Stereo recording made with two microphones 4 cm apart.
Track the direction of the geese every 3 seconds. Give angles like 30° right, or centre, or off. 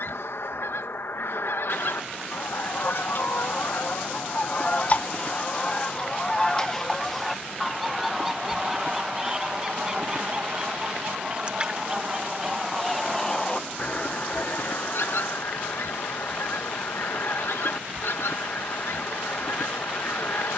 70° left, 40° left, centre, 20° right, 20° left, 70° left, 70° left.